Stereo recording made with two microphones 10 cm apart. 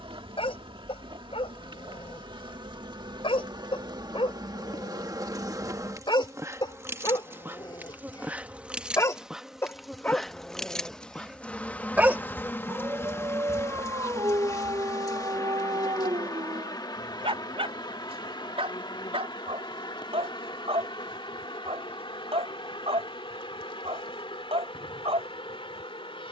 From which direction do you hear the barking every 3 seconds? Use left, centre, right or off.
left, left, left, centre, right, right, right, right, right.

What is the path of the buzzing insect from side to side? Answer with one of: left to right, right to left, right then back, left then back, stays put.
right to left.